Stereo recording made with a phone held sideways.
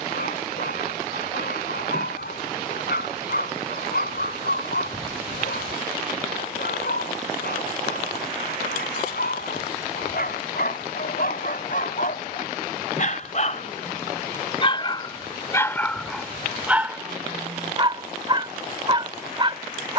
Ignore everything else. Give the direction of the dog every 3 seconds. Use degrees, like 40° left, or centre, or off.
70° left, 70° left, 70° left, 60° left, 40° left, 10° right, 30° right.